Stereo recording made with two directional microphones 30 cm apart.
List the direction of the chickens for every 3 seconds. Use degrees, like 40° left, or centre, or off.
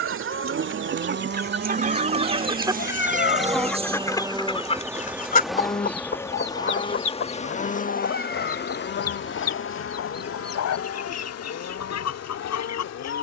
30° right, 20° left, 50° left, 60° left, 70° left.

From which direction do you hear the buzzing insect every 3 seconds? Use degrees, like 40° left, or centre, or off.
40° right, 10° right, 20° left, 50° left, 60° left.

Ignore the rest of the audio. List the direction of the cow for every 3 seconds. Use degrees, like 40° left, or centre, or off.
40° right, centre, 30° left, 50° left, 50° left.